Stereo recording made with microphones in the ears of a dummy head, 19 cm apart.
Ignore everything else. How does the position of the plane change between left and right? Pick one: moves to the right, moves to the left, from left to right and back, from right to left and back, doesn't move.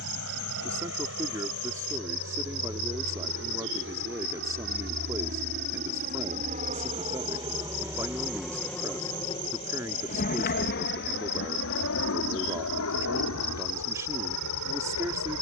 moves to the left.